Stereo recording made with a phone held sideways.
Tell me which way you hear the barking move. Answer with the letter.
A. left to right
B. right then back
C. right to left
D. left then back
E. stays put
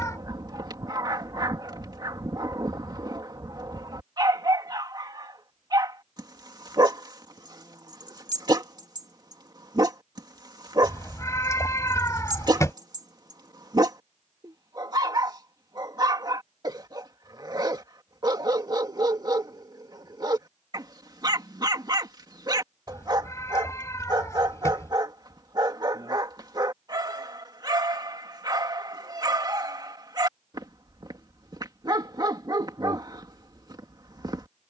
E.